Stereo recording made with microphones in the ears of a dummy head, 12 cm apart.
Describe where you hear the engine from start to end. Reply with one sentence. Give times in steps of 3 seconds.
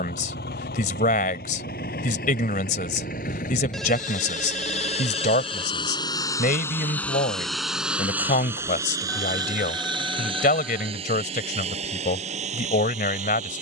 You can hear the engine on the left from 0 s, in the centre from 6 s and on the right from 9 s.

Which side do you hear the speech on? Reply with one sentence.
You can hear the speech on the left.